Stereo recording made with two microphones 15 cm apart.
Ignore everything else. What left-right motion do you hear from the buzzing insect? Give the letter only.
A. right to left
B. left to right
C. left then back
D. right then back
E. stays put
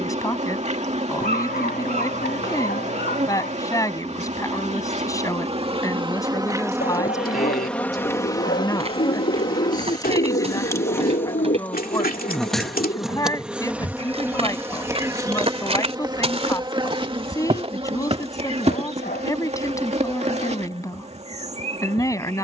C.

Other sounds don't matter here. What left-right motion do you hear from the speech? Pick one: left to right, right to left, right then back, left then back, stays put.
stays put.